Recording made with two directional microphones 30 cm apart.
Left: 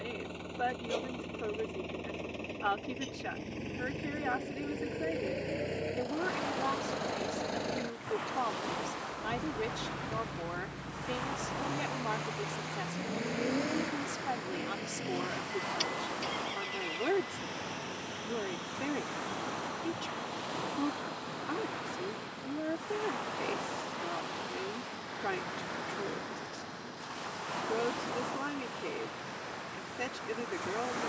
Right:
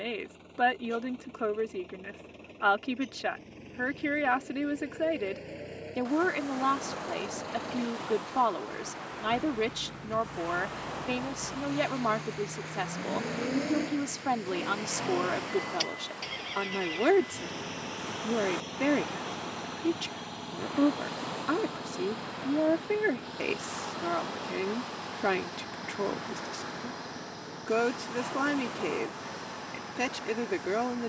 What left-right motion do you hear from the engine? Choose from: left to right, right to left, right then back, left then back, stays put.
left to right.